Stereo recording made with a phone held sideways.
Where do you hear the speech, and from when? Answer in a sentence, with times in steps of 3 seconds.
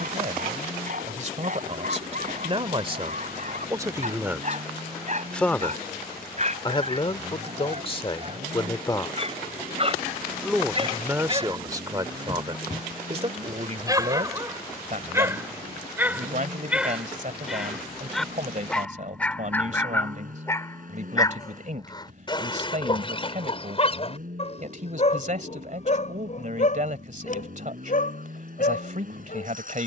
You can hear the speech on the right from 0 s, in the centre from 3 s, on the left from 6 s, in the centre from 9 s and on the right from 12 s.